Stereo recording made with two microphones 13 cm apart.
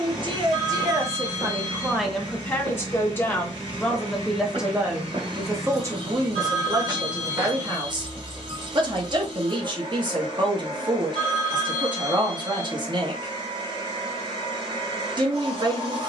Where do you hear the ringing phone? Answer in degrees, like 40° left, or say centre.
60° right.